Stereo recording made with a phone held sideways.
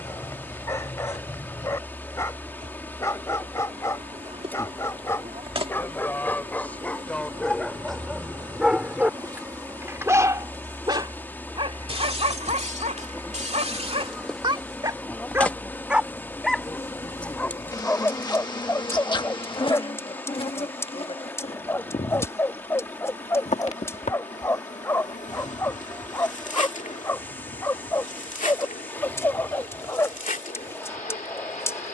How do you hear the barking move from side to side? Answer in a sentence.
In this clip you hear the barking move from left to right and back again.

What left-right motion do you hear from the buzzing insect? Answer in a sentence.
You can hear the buzzing insect travel towards the left.